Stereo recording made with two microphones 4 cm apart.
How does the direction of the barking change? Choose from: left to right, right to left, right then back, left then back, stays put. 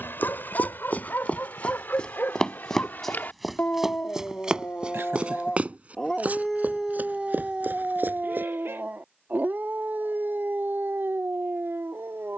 left to right.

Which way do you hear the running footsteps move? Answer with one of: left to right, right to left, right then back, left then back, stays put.
left to right.